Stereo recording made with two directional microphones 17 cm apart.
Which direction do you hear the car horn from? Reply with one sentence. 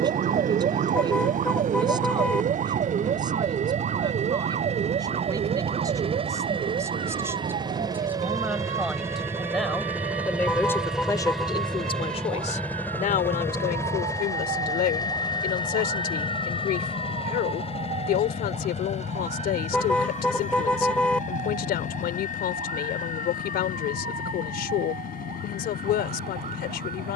In this clip you hear the car horn in the centre.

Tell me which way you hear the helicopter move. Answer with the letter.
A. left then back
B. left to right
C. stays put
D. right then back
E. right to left
E.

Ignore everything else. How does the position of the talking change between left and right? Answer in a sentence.
You can hear the talking move to the left.